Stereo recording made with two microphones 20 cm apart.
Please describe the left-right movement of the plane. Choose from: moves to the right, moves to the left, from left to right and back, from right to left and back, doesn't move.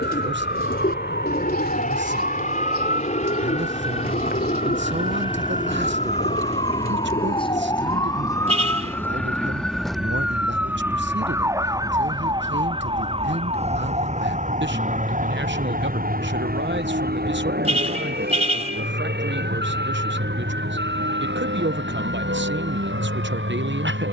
moves to the right.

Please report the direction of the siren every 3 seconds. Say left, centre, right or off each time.
left, left, left, centre, right, right, right, right.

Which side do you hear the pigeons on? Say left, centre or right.
left.